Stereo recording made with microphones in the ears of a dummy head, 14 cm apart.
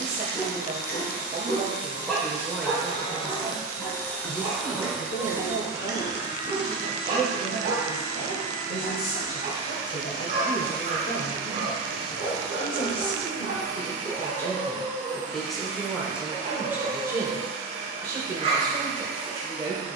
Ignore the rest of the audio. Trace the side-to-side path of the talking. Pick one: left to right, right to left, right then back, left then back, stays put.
left then back.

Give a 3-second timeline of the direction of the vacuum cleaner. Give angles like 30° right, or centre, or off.
50° left, centre, 40° right, 50° right, 60° right, 60° right, 60° right.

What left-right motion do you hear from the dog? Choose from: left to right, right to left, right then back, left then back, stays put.
left to right.